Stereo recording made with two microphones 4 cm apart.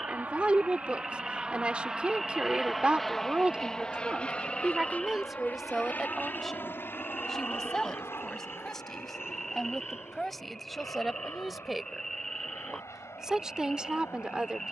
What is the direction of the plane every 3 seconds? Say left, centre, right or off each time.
right, left, left, left, left.